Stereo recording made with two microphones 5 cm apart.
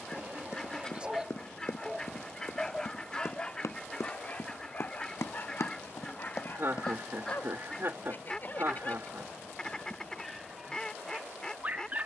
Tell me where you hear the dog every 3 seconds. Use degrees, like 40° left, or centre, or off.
20° right, 30° left, 40° left, 10° right.